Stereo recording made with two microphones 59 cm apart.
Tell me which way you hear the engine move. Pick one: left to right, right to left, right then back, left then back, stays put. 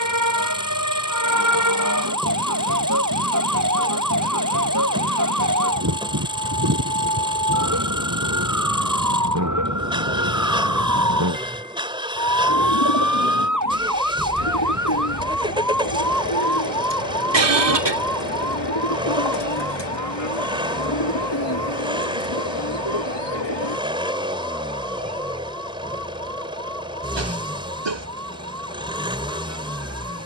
stays put.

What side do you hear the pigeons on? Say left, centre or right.
left.